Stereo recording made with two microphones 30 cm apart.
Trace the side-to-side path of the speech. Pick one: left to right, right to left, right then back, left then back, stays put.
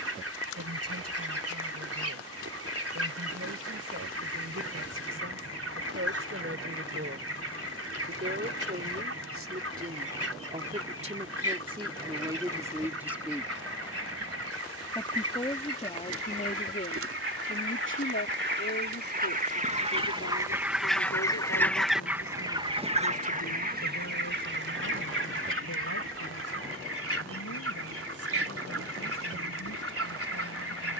right to left.